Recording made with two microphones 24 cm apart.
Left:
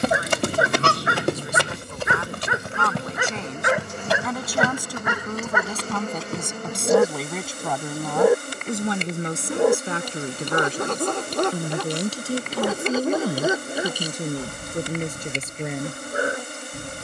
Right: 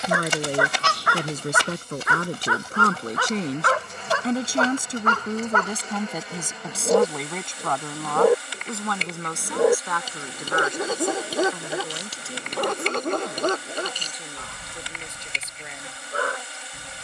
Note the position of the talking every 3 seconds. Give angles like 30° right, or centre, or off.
50° right, 30° right, 10° left, 30° left, 50° left, 50° left.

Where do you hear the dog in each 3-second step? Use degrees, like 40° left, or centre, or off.
20° left, 10° left, 10° left, centre, 10° left, 20° left.